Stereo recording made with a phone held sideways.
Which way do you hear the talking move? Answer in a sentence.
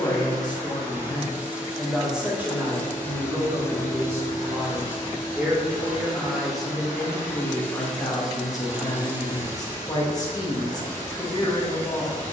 In this clip you hear the talking move from left to right and back again.